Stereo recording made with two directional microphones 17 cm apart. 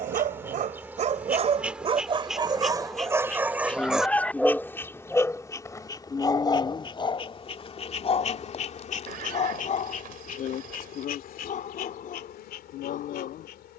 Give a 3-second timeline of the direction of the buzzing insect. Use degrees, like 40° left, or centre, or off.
10° right, 10° left, 30° left, 50° left, 70° left.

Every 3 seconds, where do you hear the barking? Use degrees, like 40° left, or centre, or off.
40° right, centre, 30° left, 40° left, 50° left.